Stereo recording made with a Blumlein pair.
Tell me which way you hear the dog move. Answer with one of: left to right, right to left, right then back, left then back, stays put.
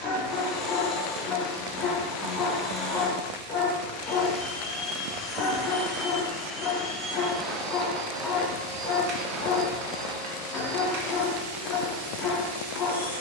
stays put.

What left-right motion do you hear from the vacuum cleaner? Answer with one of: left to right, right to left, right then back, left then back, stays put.
left to right.